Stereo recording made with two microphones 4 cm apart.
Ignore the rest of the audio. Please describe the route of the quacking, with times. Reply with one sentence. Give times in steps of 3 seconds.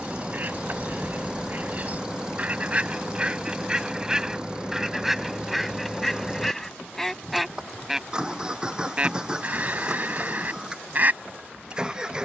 In this clip you hear the quacking on the right from 0 s, in the centre from 3 s and on the right from 9 s.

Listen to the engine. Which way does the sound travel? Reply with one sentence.
In this clip you hear the engine stay in one place.